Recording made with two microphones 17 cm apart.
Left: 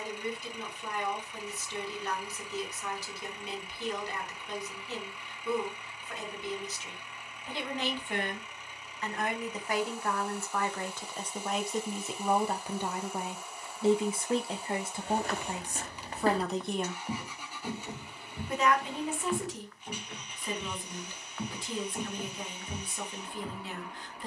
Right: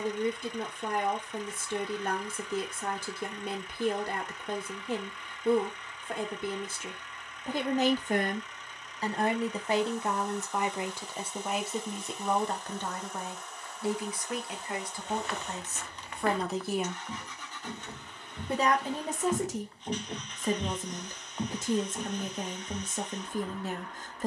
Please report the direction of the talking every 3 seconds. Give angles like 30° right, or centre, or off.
50° right, 50° right, 50° right, 20° right, 20° left, 10° left, 40° right, 40° right.